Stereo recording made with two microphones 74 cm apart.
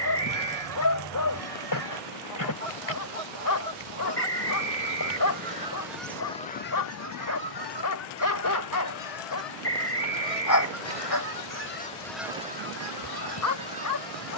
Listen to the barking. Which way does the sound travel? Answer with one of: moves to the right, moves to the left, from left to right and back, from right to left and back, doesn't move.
doesn't move.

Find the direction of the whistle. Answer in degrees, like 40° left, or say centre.
80° left.